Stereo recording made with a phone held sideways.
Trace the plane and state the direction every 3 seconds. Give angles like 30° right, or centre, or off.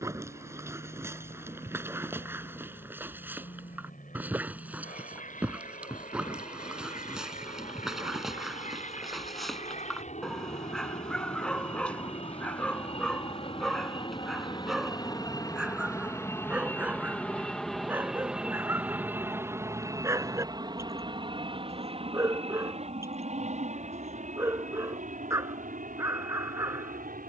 70° left, 70° left, 60° left, 50° left, 40° left, 10° left, 20° right, 40° right, 50° right.